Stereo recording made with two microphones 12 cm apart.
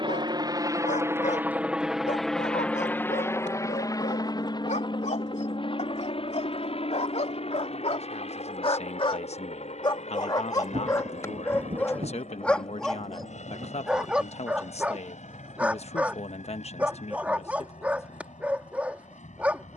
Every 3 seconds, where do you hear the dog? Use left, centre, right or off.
left, left, left, left, centre, centre, centre.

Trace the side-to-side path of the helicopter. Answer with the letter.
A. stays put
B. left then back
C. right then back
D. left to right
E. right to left
E.